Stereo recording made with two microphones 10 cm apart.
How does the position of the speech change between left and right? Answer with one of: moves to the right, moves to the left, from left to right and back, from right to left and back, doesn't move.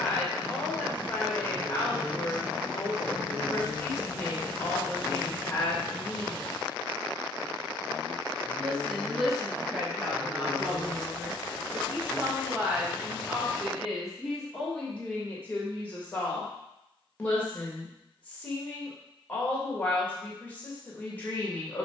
from left to right and back.